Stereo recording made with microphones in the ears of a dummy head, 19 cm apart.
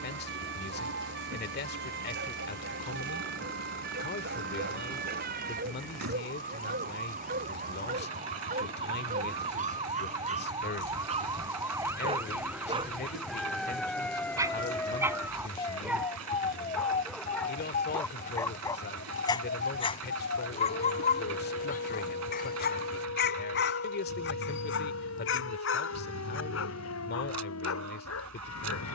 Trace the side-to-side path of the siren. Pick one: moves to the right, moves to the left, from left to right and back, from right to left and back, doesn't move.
moves to the left.